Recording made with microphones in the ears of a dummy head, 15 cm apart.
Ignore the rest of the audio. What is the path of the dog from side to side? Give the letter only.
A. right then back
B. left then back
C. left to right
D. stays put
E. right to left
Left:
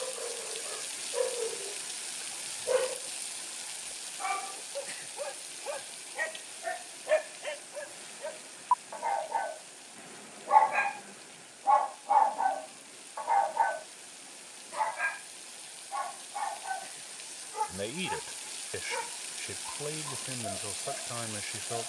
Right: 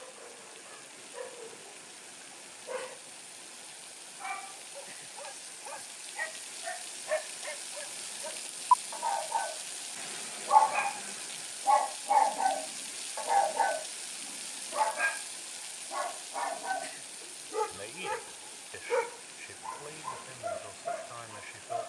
C.